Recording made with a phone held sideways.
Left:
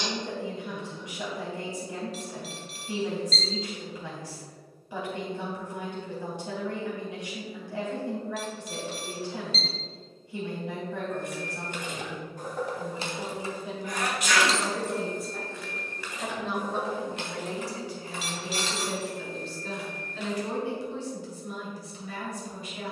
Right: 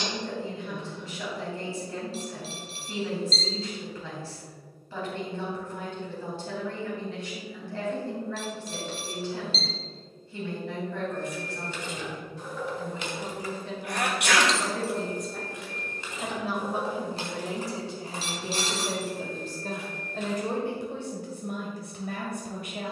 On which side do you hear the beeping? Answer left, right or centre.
right.